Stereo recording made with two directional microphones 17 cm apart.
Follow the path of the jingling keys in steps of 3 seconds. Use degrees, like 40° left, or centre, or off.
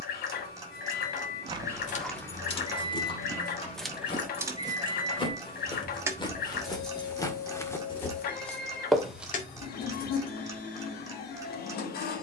40° left, 10° right, 20° left, 50° left.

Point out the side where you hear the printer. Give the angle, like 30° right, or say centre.
60° left.